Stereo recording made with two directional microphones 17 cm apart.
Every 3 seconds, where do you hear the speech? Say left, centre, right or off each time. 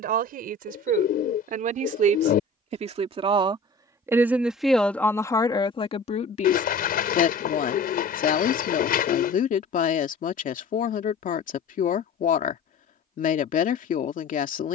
right, centre, left, left, left.